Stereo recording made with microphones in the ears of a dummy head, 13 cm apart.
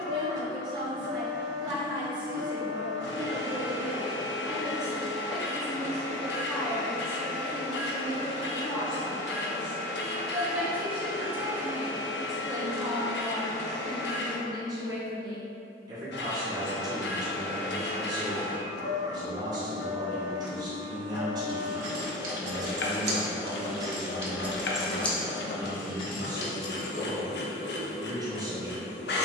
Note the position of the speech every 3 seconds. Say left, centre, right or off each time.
right, centre, centre, centre, right, right, right, right, right, right.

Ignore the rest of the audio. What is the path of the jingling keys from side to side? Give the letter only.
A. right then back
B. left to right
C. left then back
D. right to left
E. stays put
D.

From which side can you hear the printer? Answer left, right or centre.
left.